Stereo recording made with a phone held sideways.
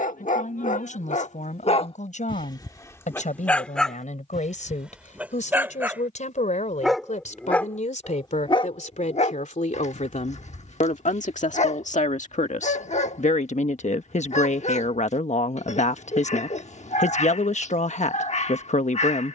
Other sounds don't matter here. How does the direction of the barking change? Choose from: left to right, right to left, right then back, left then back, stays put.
right then back.